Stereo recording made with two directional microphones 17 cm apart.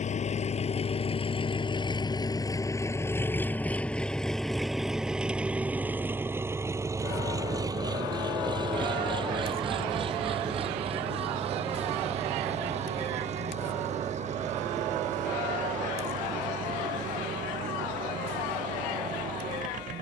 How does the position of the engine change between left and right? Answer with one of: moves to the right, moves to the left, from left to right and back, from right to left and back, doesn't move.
moves to the right.